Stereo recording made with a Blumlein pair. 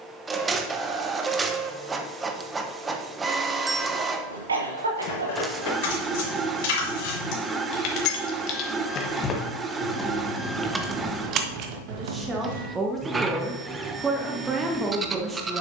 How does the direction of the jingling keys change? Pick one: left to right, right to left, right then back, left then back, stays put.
left to right.